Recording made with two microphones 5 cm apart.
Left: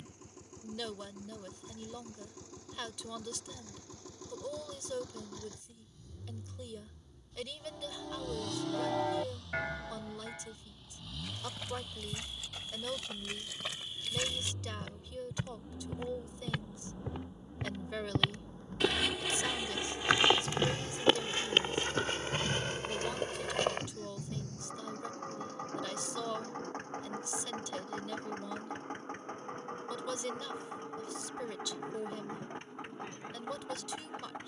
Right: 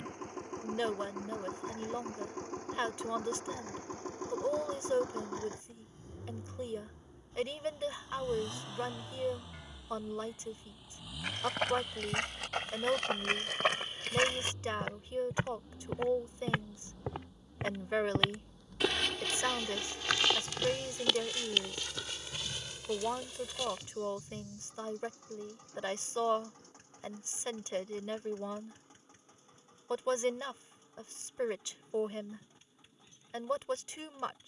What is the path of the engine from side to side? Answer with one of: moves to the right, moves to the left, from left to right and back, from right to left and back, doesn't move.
moves to the left.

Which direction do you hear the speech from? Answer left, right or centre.
right.